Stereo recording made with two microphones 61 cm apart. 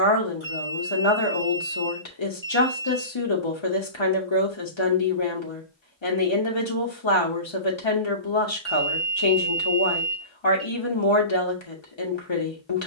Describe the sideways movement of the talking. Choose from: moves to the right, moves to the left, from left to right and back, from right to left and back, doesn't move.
doesn't move.